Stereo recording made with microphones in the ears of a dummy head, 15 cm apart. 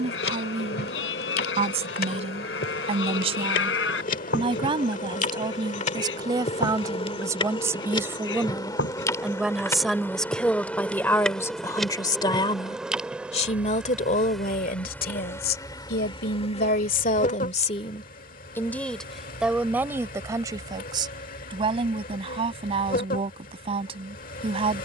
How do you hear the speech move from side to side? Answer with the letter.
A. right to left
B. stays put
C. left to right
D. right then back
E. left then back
E.